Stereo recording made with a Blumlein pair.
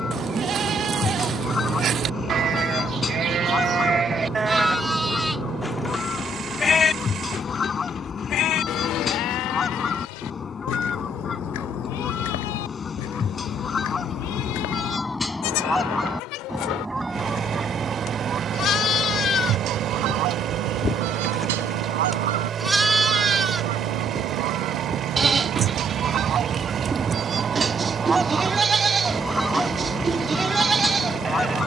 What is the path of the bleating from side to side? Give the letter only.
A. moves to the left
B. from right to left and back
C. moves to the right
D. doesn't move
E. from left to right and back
B.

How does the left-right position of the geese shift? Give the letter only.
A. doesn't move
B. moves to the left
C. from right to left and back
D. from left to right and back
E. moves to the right
D.